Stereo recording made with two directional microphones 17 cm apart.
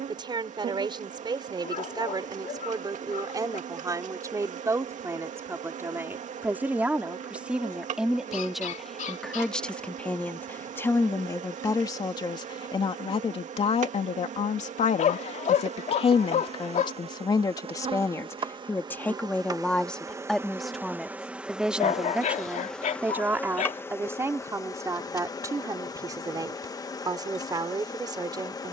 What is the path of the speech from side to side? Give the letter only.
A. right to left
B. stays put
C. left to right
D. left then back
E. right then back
D.